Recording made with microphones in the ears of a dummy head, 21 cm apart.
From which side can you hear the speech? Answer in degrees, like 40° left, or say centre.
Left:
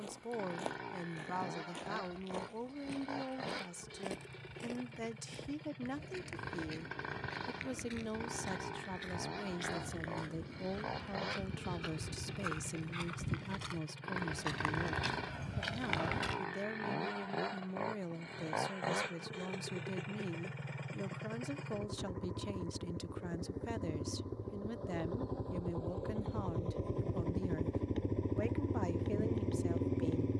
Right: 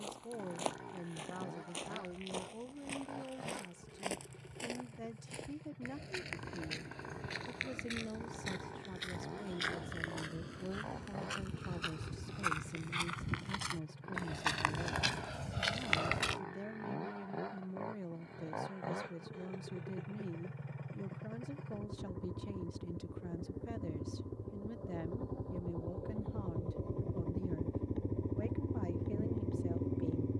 40° left.